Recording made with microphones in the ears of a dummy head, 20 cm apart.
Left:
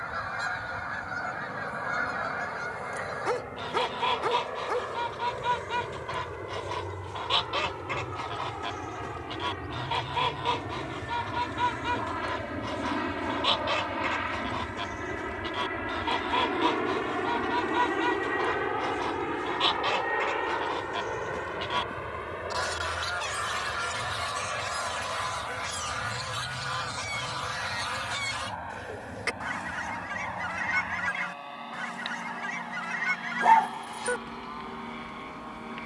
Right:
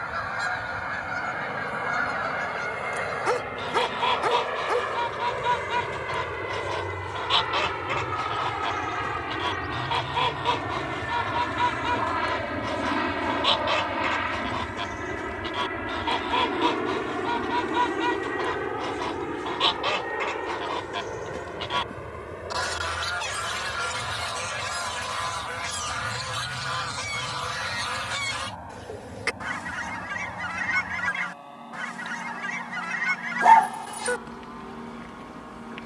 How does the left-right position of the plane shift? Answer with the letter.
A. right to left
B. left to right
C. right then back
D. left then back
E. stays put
A.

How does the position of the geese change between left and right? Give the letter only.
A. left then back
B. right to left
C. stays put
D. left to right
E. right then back
C.